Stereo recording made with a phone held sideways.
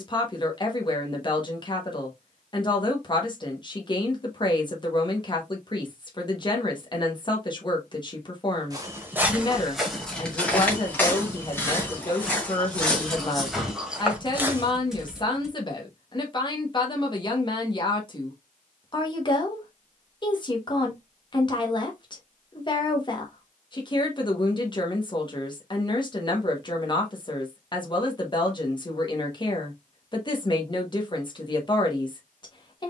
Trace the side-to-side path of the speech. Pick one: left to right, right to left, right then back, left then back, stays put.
stays put.